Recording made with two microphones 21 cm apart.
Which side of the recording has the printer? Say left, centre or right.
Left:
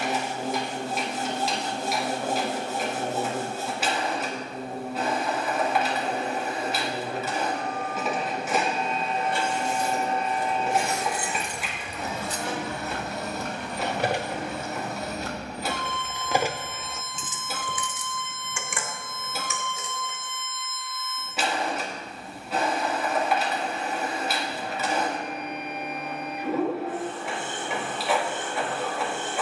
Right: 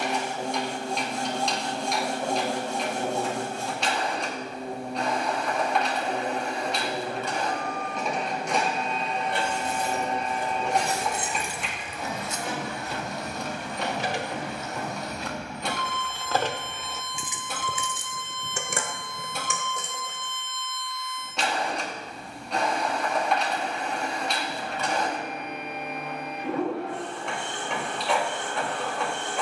centre.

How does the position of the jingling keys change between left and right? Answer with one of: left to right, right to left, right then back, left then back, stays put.
left then back.